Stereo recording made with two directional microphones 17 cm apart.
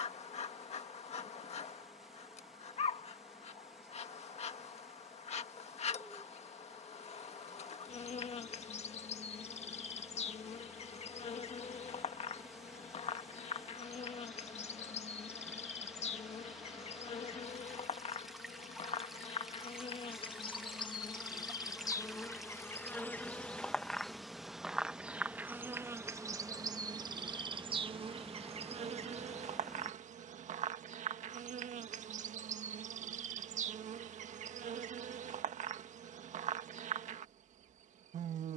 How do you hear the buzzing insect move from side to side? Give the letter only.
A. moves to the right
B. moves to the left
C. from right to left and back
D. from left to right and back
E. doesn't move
A.